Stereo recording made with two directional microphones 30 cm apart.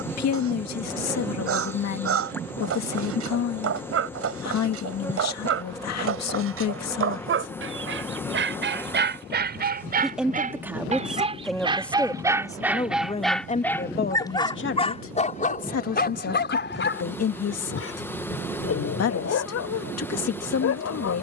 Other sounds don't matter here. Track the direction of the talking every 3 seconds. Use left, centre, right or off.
left, left, left, centre, left, left, left.